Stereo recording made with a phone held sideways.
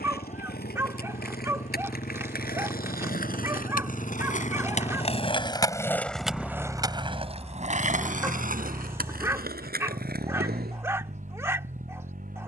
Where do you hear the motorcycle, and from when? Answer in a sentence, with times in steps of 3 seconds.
You can hear the motorcycle on the left from 0 s, in the centre from 6 s and on the right from 9 s.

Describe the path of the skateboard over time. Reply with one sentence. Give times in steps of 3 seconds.
In this clip you hear the skateboard on the left from 0 s and on the right from 6 s.